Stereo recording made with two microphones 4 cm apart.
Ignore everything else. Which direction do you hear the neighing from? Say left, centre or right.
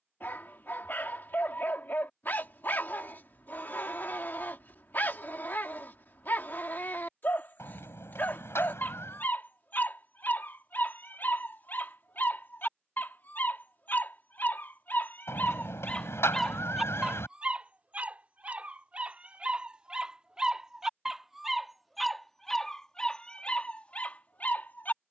left.